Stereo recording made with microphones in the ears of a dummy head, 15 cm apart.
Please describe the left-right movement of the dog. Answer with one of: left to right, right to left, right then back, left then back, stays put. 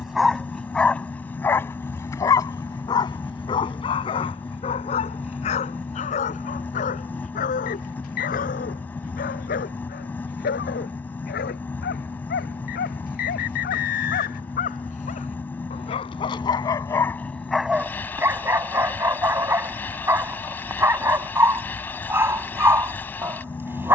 left then back.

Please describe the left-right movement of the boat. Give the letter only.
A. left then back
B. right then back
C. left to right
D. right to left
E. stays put
E.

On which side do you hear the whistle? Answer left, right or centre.
left.